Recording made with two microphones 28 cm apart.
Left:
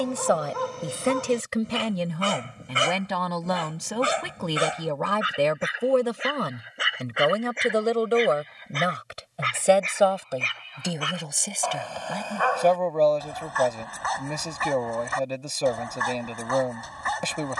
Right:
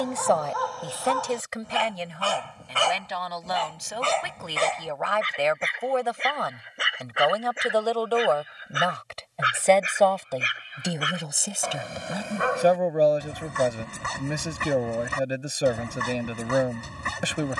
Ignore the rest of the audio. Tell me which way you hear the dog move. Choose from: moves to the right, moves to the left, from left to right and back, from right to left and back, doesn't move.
moves to the right.